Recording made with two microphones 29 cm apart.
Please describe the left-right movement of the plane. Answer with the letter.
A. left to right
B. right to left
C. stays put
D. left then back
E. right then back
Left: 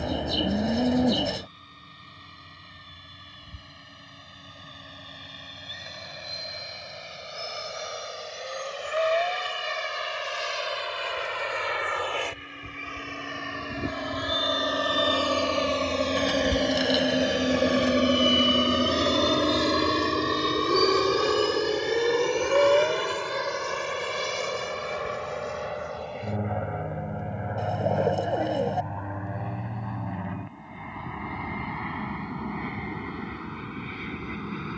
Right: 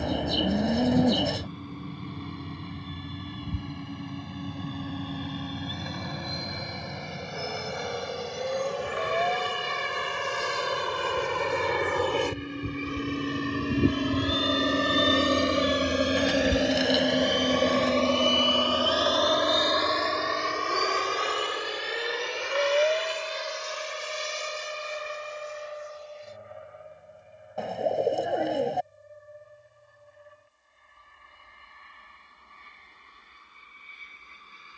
B.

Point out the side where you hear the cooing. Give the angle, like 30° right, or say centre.
centre.